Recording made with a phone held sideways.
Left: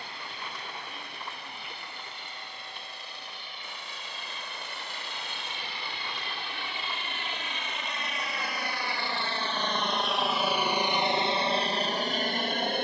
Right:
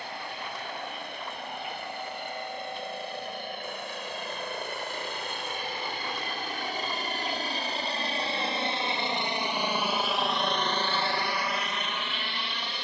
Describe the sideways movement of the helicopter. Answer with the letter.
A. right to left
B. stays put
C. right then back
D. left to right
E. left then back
A.